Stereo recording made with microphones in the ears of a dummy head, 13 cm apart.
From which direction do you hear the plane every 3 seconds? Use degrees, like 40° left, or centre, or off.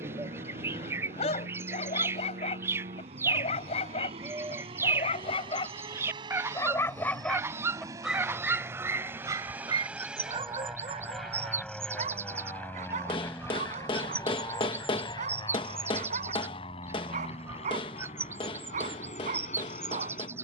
50° right, 40° right, 30° right, centre, 20° left, 40° left, 50° left.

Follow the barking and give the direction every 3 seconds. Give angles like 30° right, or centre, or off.
50° left, 40° left, centre, 30° right, 50° right, 50° right, 50° right.